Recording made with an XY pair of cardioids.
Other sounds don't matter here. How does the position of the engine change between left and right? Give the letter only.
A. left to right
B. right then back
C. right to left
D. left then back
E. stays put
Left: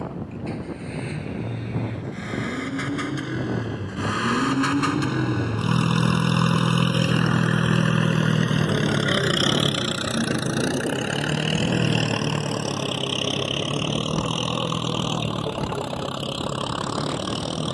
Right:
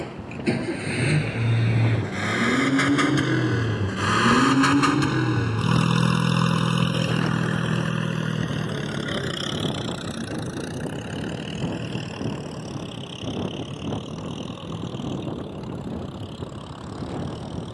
C.